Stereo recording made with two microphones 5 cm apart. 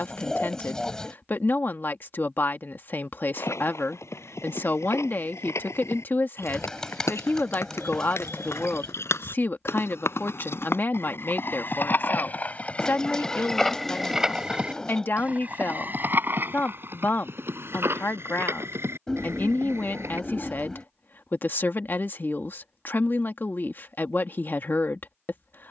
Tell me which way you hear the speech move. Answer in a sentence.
In this clip you hear the speech stay put.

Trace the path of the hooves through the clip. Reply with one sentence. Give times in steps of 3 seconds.
In this clip you hear the hooves not at all from 0 s, on the left from 3 s, in the centre from 12 s, on the right from 15 s and not at all from 21 s.